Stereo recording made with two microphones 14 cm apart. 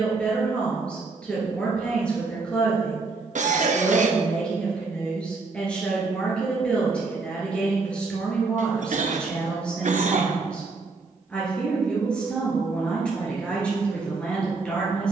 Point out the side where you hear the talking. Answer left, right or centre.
centre.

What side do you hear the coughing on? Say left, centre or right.
right.